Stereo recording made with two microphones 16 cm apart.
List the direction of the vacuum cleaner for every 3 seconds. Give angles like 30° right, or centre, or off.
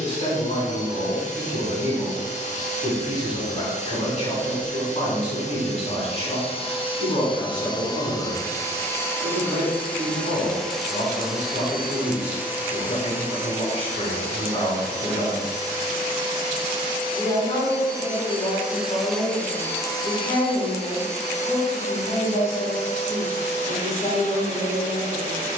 50° left, 50° left, 30° left, centre, 20° right, 30° right, 10° left, 50° left, 50° left.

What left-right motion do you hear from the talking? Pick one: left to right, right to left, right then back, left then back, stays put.
stays put.